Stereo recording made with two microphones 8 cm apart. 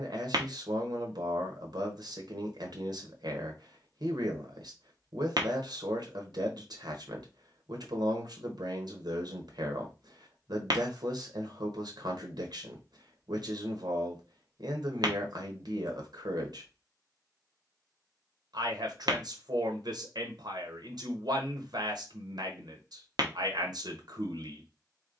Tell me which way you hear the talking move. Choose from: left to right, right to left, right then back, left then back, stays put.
stays put.